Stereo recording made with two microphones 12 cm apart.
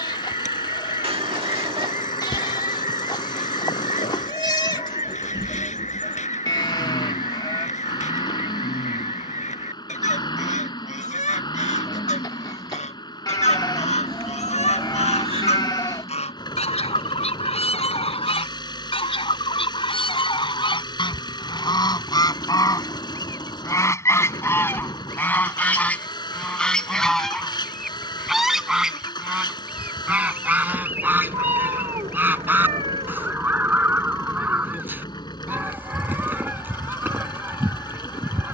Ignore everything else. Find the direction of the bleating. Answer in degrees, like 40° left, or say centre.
30° left.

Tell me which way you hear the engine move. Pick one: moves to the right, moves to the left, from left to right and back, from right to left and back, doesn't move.
doesn't move.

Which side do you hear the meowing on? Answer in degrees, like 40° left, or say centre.
50° right.